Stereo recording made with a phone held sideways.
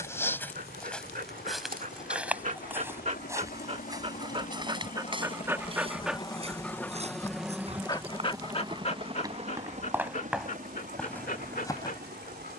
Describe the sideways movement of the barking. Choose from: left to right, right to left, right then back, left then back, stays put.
right to left.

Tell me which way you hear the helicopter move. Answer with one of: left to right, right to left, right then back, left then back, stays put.
left to right.